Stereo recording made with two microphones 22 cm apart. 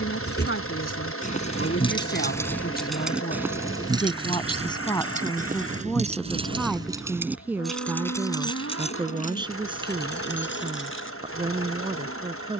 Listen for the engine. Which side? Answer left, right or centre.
left.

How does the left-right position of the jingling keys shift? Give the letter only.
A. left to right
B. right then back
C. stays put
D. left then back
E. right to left
B.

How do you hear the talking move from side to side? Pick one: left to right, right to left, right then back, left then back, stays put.
left to right.